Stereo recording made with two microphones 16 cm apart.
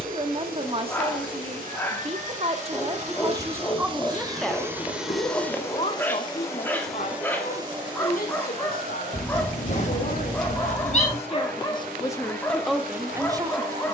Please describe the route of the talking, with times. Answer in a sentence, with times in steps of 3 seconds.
In this clip you hear the talking on the right from 0 s, in the centre from 3 s, on the left from 6 s and in the centre from 12 s.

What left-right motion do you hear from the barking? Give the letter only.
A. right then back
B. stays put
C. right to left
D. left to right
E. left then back
B.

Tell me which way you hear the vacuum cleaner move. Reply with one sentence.
You can hear the vacuum cleaner move from right to left and back again.